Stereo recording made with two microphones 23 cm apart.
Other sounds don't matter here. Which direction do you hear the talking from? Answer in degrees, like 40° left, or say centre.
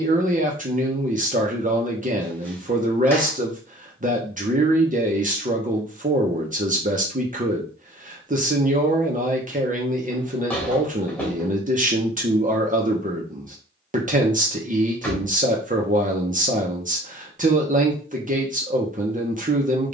40° right.